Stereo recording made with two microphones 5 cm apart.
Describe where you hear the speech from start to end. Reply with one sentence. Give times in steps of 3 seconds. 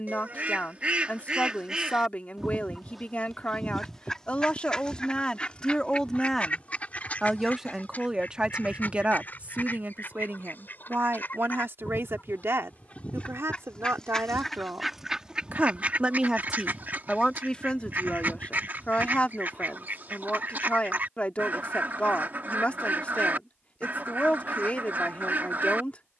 In this clip you hear the speech on the left from 0 s, in the centre from 6 s, on the right from 9 s, in the centre from 15 s and on the left from 18 s.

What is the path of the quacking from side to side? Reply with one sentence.
You can hear the quacking move from right to left and back again.